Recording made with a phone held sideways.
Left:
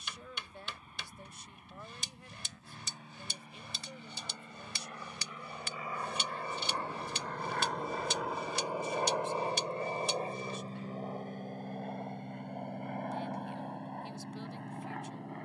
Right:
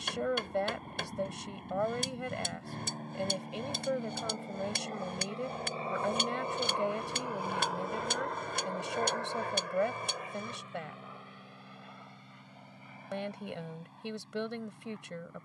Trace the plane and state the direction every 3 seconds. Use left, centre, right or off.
right, right, centre, left, left.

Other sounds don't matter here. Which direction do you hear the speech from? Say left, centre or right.
right.